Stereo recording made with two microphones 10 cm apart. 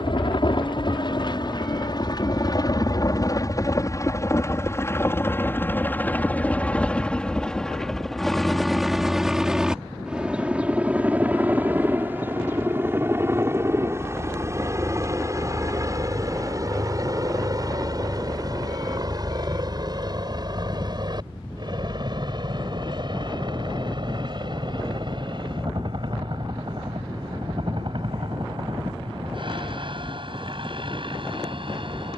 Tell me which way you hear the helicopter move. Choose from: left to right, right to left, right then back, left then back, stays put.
left to right.